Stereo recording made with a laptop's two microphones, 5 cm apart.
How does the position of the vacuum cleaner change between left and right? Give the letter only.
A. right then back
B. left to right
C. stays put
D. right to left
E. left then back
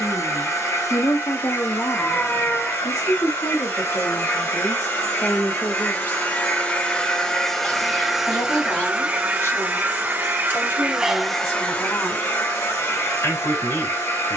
A.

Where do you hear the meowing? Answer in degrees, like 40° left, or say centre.
30° left.